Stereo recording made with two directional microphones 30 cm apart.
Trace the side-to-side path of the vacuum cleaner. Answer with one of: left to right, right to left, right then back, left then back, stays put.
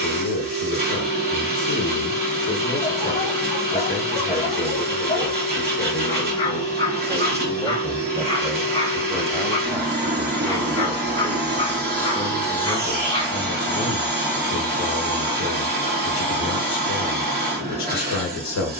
stays put.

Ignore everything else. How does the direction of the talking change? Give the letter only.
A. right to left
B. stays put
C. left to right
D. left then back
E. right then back
E.